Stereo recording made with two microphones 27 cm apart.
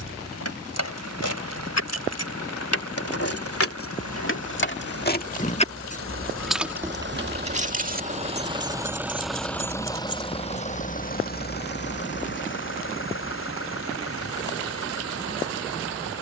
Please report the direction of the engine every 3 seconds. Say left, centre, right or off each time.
right, right, right, left, left, left.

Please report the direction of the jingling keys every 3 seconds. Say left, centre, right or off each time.
left, left, right, right, off, off.